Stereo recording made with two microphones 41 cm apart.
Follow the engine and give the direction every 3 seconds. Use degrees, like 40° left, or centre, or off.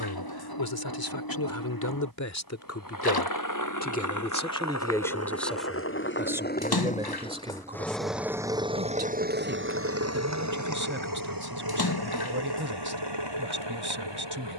50° left, 40° left, 10° left, 40° right, 60° right.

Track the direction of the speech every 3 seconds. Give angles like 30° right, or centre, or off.
50° left, 10° left, 10° right, 30° right, 30° right.